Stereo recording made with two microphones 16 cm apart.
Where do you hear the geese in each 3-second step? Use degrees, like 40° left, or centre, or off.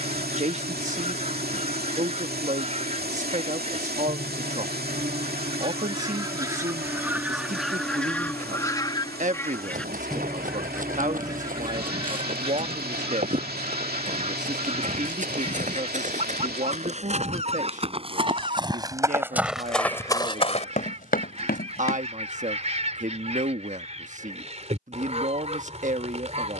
50° right, 40° right, centre, 10° right, 40° right, 40° right, 40° right, 40° right, 40° right.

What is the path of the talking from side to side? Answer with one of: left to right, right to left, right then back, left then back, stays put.
stays put.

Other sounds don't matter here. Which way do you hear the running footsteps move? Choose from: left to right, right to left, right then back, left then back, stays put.
right to left.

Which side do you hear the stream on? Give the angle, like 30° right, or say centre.
80° right.